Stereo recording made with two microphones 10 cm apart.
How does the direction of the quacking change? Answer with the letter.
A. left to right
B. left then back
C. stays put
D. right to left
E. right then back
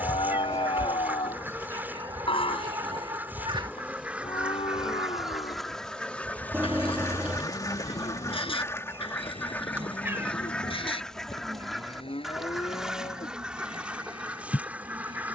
B.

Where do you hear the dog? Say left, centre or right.
right.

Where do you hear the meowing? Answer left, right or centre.
right.